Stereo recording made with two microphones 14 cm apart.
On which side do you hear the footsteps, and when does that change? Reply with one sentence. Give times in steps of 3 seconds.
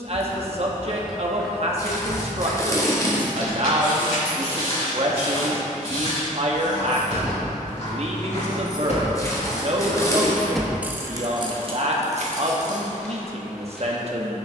You can hear the footsteps in the centre from 0 s, on the left from 3 s and in the centre from 12 s.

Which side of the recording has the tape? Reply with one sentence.
You can hear the tape on the left.